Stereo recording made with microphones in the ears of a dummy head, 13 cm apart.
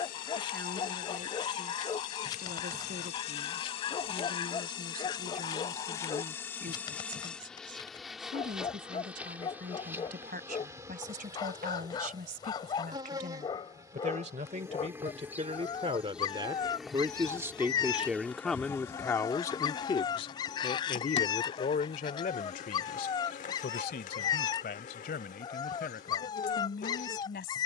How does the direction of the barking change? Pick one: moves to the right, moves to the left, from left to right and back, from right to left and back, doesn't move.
doesn't move.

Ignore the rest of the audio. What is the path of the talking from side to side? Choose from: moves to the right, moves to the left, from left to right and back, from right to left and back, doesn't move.
moves to the left.